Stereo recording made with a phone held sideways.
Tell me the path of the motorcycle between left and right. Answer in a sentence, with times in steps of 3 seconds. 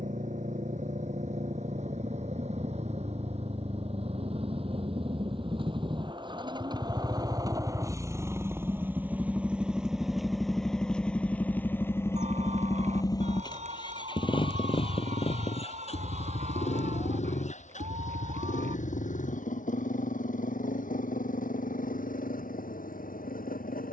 In this clip you hear the motorcycle on the right from 0 s, in the centre from 9 s and on the left from 12 s.